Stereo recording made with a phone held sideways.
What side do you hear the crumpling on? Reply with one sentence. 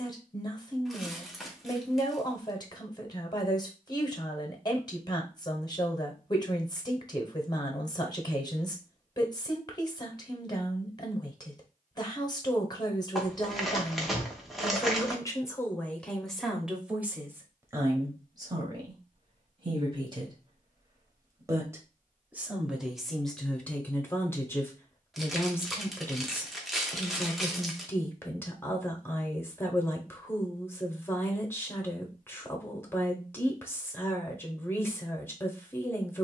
You can hear the crumpling in the centre.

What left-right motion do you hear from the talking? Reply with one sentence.
You can hear the talking move from left to right and back again.